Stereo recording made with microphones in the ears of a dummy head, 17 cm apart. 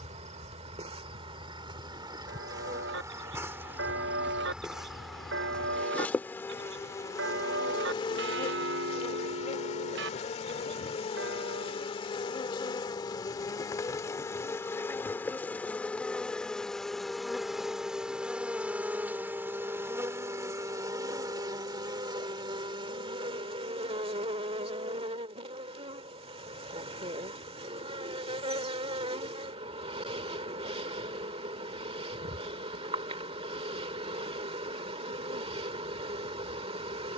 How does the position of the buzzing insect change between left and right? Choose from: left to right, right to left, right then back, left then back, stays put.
left then back.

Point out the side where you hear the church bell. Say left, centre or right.
right.